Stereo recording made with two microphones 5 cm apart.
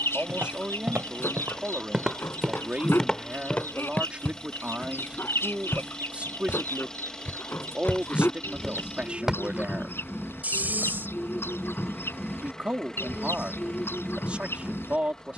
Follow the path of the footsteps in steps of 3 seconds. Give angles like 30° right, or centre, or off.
30° right, 40° left, 30° left, 30° right, off.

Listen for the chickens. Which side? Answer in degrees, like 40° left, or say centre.
60° left.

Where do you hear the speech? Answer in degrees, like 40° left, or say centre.
30° right.